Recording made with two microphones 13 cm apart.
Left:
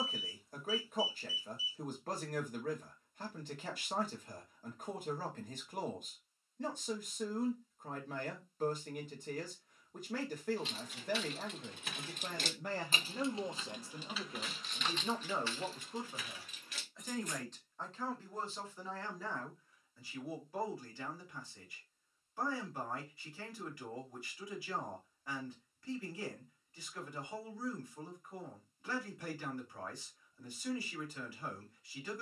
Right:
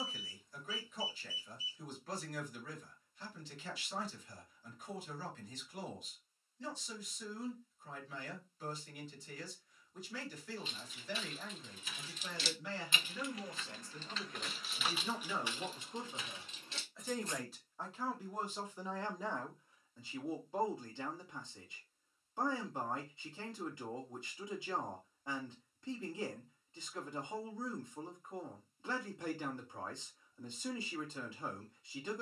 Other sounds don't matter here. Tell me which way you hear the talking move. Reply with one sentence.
In this clip you hear the talking travel towards the right.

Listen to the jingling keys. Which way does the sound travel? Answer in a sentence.
In this clip you hear the jingling keys go from the left side to the right.